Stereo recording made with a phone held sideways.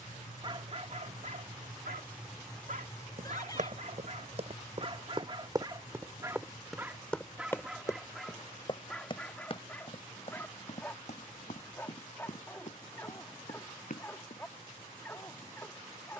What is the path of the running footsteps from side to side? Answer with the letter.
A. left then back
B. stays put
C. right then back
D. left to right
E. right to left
E.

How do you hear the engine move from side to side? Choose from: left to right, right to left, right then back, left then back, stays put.
right to left.